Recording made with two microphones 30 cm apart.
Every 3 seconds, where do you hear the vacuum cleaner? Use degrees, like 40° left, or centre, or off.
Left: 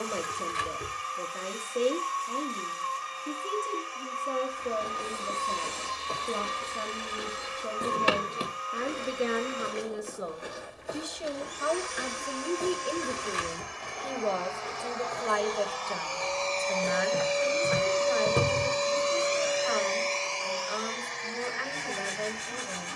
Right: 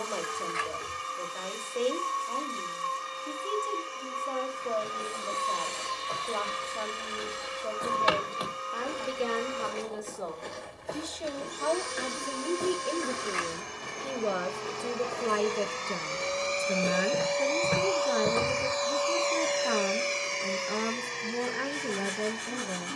50° right, 50° right, 50° right, 50° right, 40° right, 10° right, 10° left, 40° right.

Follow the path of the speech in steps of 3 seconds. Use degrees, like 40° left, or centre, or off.
30° left, 30° left, 30° left, 20° left, 10° right, 40° right, 50° right, 50° right.